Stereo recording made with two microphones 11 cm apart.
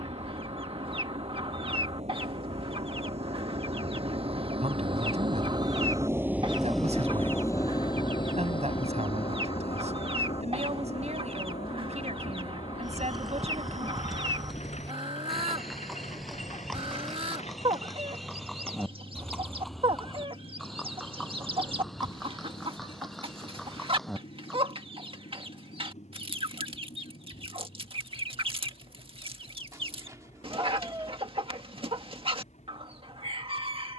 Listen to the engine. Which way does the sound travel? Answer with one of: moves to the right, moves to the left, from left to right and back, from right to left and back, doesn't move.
moves to the left.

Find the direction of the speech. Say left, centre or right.
right.